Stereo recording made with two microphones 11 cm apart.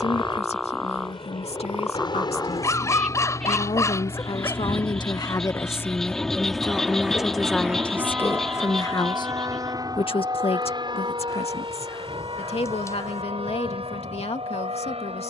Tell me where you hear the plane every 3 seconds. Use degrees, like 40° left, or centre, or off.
50° left, 30° left, 10° right, 40° right, 50° right.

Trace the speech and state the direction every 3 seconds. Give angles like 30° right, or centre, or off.
80° left, 50° left, 10° left, 60° left, 80° left.